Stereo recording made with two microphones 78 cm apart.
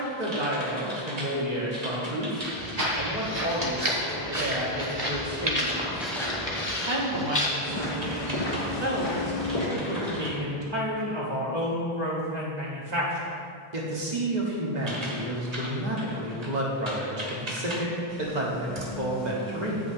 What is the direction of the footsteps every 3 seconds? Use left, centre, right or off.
right, right, left, left, off, off, off.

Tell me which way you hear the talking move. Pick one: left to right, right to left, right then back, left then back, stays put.
stays put.